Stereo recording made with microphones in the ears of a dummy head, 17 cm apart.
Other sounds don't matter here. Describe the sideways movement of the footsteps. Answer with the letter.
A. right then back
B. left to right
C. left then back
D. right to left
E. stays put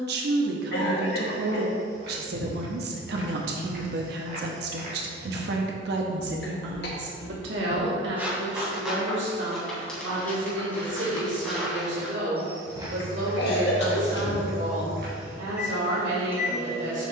C.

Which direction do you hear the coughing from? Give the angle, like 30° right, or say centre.
60° left.